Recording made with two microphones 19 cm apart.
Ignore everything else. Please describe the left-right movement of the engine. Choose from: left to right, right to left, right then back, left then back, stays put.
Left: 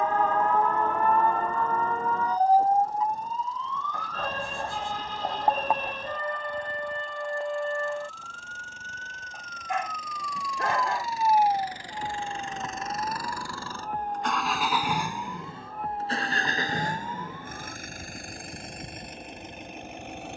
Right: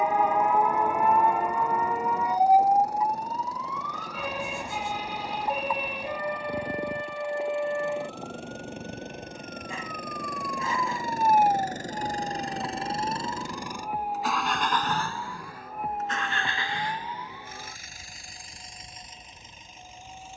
right to left.